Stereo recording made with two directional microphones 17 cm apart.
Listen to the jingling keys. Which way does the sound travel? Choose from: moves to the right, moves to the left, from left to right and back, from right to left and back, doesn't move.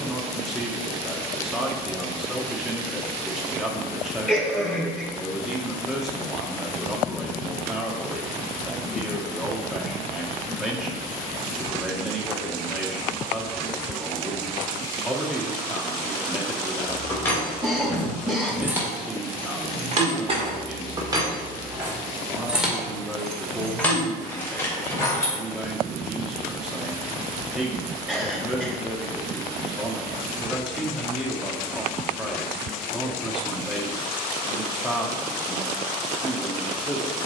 from left to right and back.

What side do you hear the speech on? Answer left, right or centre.
centre.